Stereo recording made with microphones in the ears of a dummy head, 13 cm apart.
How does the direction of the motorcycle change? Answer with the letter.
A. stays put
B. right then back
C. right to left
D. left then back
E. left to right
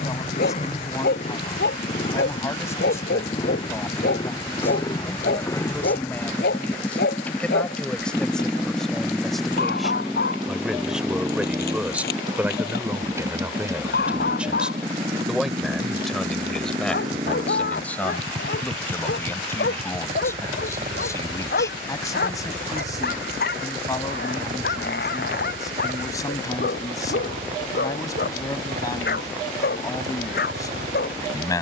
E.